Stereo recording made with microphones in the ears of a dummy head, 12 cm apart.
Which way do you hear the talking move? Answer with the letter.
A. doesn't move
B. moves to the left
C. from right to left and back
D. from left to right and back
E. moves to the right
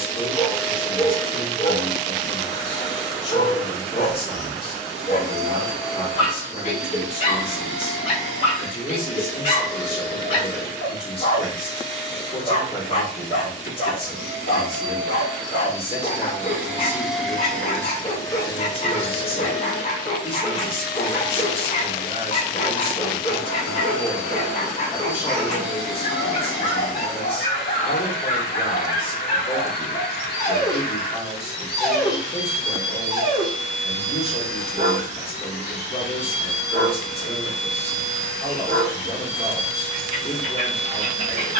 A.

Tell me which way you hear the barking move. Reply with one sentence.
In this clip you hear the barking travel towards the right.